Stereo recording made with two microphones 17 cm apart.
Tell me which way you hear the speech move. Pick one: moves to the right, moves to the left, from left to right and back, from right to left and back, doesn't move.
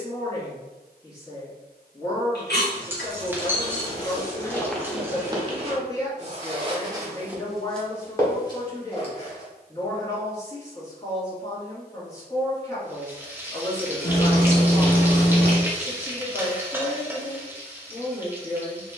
doesn't move.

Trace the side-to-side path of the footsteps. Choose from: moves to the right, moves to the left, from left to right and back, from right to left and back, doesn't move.
from left to right and back.